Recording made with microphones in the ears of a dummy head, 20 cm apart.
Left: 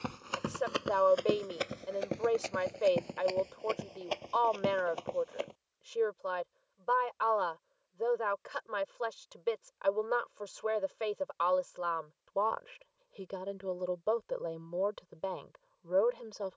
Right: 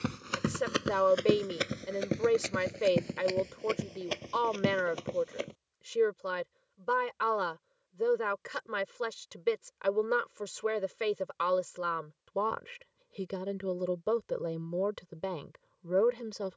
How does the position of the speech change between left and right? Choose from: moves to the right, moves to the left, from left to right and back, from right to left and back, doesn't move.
doesn't move.